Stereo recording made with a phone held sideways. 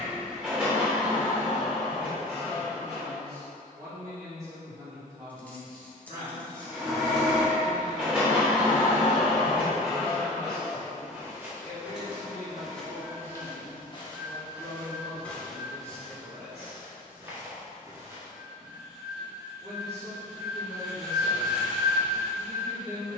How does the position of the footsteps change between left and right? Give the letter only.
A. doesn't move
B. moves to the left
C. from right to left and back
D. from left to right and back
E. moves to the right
C.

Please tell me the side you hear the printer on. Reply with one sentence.
You can hear the printer in the centre.